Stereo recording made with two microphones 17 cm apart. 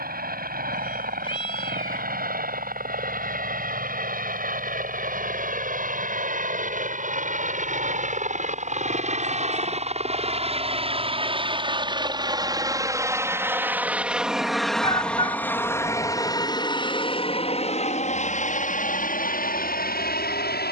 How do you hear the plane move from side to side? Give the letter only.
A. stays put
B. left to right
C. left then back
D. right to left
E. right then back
D.